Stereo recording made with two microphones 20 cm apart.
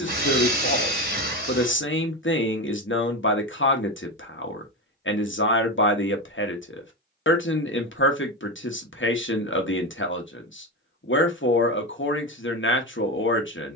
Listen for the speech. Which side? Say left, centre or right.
left.